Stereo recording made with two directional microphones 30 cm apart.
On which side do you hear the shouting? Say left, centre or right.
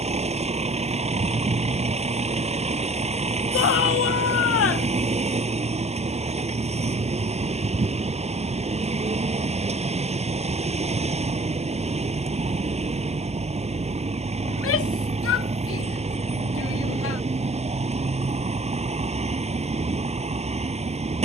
left.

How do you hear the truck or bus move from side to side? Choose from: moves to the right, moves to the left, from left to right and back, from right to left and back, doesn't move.
doesn't move.